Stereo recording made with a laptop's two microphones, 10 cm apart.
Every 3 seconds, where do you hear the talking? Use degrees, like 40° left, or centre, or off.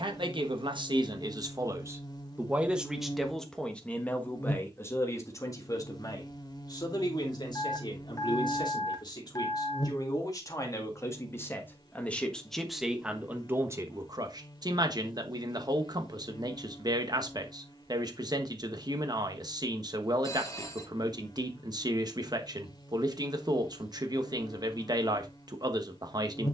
40° right, 20° left, 40° left, 30° left, 20° right, 40° right, 40° right, 40° right, 40° right.